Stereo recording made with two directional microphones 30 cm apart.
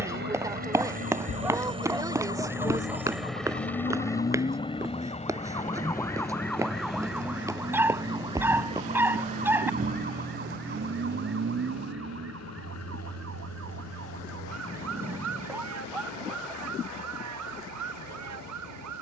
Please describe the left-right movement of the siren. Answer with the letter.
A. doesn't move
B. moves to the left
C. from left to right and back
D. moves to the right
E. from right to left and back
D.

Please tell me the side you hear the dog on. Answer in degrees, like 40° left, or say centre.
10° right.